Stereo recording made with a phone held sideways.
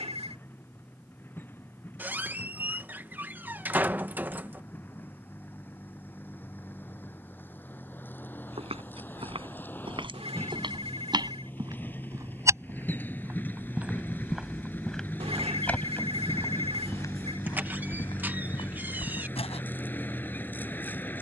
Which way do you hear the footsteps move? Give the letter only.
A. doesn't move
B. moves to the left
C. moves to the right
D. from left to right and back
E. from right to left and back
B.